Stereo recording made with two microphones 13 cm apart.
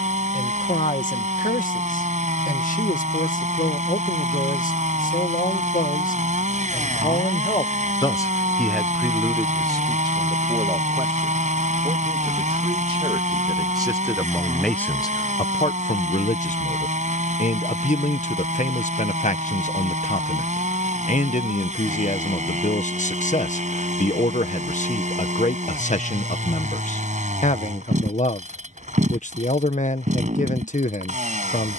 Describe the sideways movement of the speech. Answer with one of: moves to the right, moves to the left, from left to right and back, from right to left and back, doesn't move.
from left to right and back.